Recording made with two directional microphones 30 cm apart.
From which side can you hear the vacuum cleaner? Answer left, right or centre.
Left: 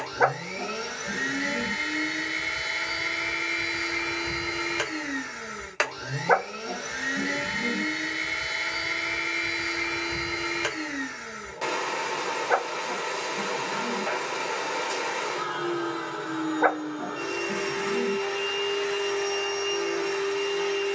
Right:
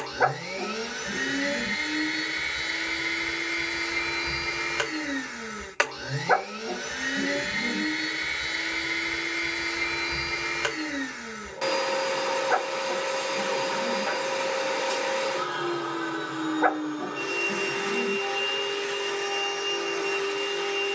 centre.